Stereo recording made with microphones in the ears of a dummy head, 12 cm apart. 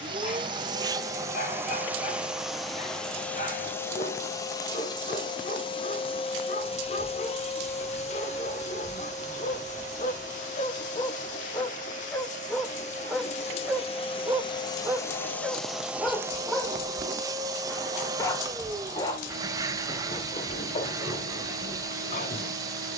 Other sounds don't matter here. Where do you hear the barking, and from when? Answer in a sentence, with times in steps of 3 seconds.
In this clip you hear the barking on the left from 0 s, in the centre from 12 s and on the left from 18 s.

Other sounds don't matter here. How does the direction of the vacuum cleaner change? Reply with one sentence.
You can hear the vacuum cleaner move from right to left and back again.